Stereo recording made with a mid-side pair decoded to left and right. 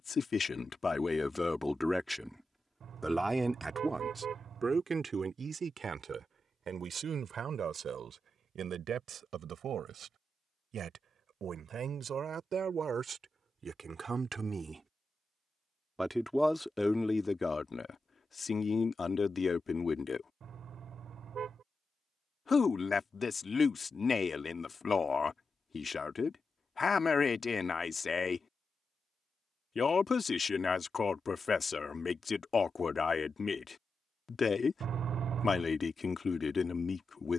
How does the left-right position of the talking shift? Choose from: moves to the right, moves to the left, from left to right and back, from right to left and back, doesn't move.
from left to right and back.